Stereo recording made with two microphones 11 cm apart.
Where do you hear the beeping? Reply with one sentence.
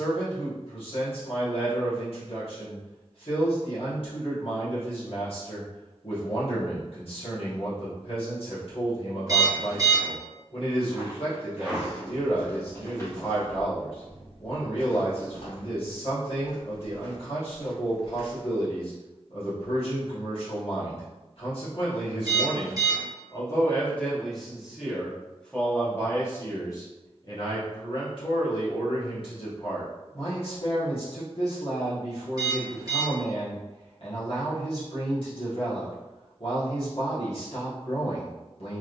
In this clip you hear the beeping on the right.